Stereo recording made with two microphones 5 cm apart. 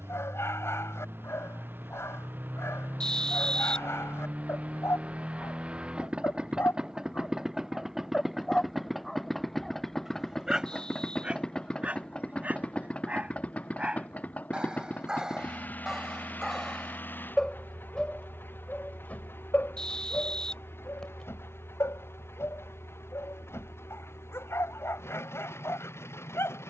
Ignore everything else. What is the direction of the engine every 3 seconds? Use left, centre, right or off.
right, right, centre, centre, left, left, left, left, left.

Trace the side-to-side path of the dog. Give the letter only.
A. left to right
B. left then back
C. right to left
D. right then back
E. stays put
D.